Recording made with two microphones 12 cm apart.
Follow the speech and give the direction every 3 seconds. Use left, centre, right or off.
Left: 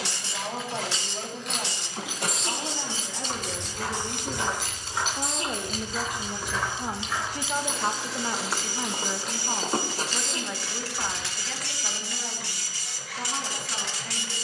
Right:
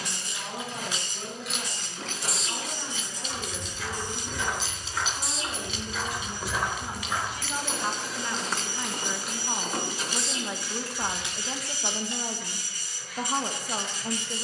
left, left, left, centre, right.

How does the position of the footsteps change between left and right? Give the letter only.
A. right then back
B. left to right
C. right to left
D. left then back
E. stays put
A.